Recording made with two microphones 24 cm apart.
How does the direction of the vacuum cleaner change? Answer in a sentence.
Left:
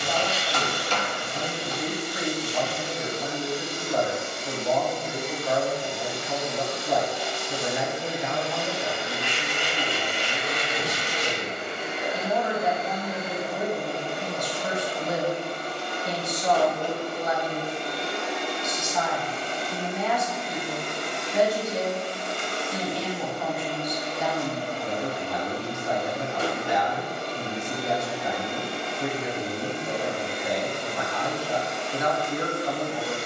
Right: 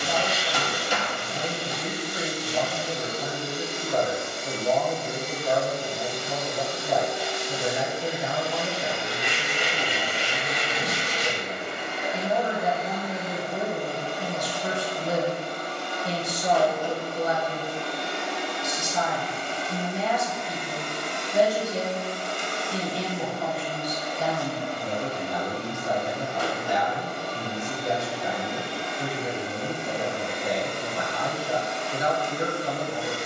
In this clip you hear the vacuum cleaner move from right to left.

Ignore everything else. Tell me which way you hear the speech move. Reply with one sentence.
In this clip you hear the speech stay put.